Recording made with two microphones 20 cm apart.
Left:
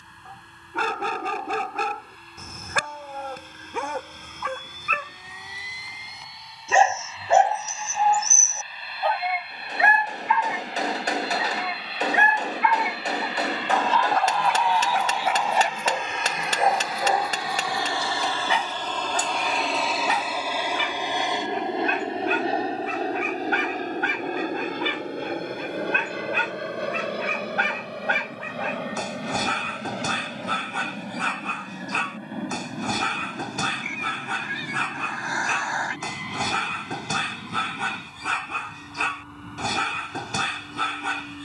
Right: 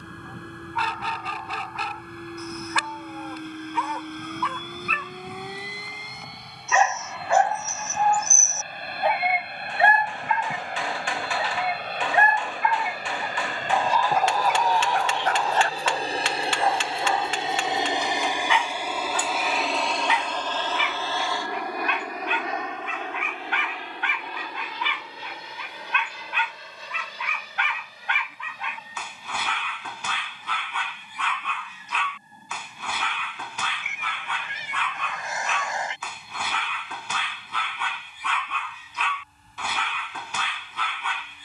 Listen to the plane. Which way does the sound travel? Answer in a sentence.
In this clip you hear the plane travel towards the left.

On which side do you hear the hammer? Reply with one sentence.
You can hear the hammer on the left.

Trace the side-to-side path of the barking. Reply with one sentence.
In this clip you hear the barking go right and come back.